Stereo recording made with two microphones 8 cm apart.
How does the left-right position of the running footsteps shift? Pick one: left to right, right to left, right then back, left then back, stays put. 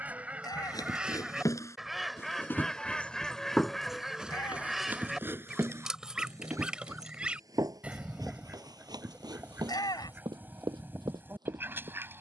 left to right.